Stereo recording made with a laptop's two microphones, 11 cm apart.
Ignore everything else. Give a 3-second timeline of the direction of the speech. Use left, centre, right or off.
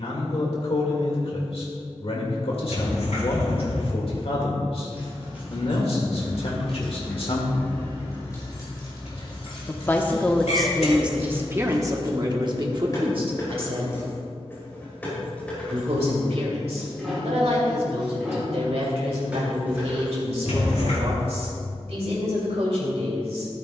left, left, left, centre, right, right, right, right.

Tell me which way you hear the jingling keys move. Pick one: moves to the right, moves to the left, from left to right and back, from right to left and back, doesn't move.
from right to left and back.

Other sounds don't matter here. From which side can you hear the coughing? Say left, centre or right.
left.